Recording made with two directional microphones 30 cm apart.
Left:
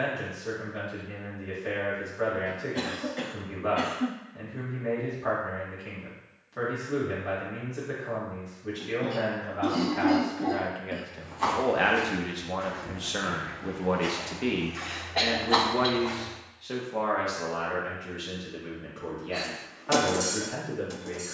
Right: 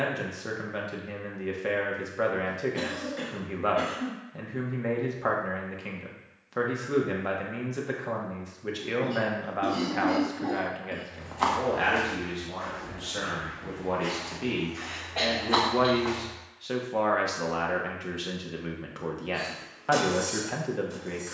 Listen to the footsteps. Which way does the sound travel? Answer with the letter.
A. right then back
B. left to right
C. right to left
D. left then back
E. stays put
D.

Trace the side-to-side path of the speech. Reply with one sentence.
You can hear the speech move from right to left and back again.